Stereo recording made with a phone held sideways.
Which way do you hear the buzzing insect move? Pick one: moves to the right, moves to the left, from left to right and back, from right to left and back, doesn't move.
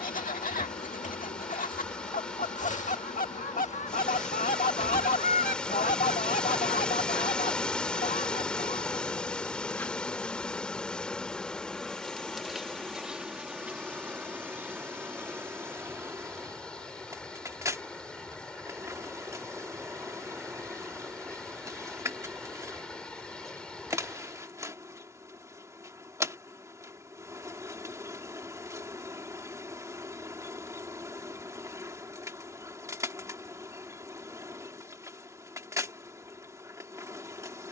moves to the right.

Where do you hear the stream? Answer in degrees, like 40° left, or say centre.
10° left.